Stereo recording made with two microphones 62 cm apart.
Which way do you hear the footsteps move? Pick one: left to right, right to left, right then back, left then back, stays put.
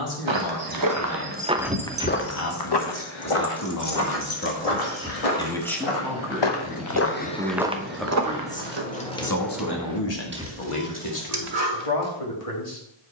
left then back.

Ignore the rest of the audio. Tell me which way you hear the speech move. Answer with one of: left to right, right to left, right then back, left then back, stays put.
right then back.